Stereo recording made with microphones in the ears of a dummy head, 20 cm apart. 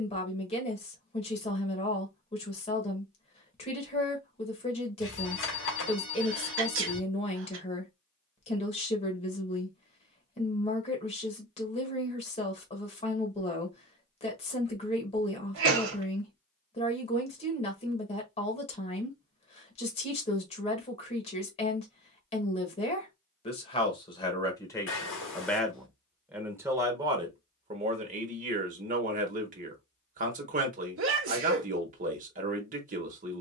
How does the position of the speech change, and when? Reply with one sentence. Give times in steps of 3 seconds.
You can hear the speech on the left from 0 s, in the centre from 24 s and on the right from 27 s.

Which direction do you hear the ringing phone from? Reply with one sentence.
In this clip you hear the ringing phone on the left.